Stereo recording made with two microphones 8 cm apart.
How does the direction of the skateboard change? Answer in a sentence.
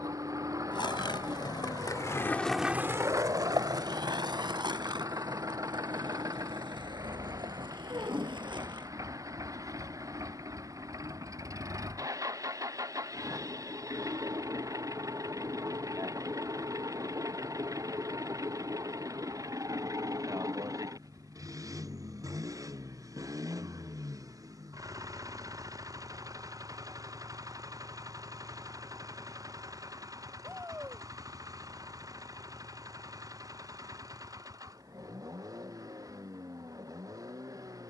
In this clip you hear the skateboard go from the left side to the right.